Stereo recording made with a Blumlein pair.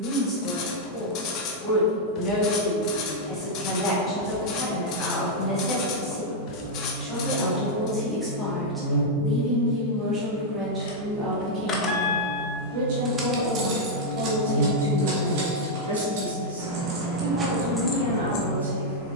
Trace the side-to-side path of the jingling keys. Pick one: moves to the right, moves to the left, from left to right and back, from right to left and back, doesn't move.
from left to right and back.